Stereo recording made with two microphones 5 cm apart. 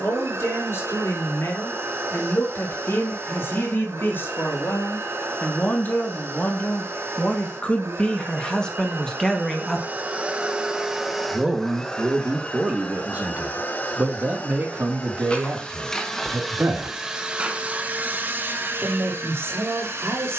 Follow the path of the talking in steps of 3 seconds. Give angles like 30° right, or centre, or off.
60° left, 50° left, 30° left, centre, 40° right, 50° right, 70° right.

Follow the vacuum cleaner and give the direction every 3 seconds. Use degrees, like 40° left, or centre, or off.
70° right, 70° right, 70° right, 20° right, 30° left, centre, 60° right.